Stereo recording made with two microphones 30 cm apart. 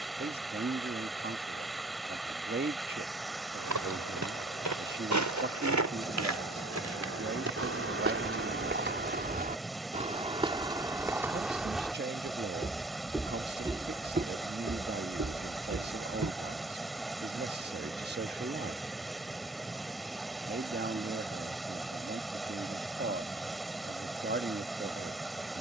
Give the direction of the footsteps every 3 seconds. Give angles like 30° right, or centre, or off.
off, 70° right, 50° right, 20° right, 10° right, 60° right, off, off, off.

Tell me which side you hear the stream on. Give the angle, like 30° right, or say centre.
centre.